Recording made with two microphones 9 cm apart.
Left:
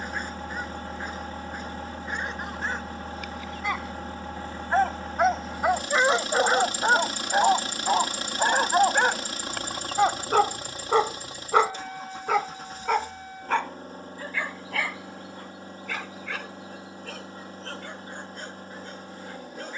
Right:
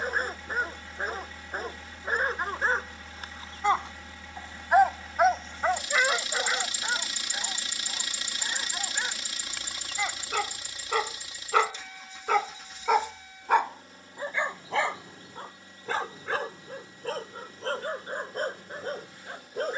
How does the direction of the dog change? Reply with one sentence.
In this clip you hear the dog move from right to left and back again.